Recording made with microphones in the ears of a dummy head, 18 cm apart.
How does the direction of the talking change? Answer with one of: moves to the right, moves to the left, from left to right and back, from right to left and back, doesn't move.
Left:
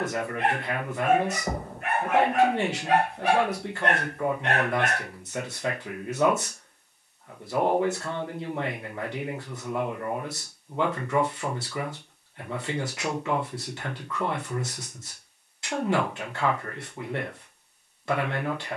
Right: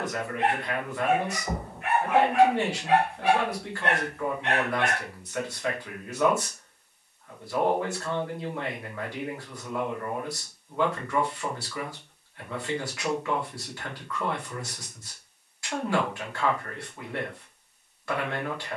doesn't move.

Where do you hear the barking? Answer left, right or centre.
left.